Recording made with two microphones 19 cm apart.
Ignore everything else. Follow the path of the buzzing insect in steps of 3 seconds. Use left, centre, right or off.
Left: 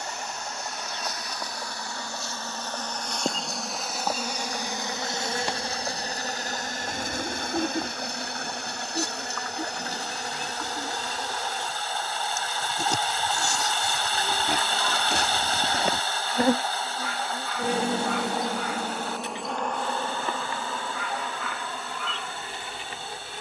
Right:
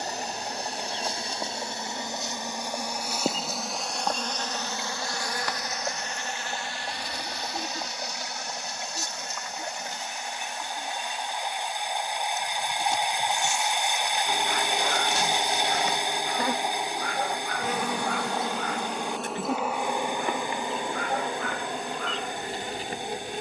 right, centre, left, left, left, left, centre, right.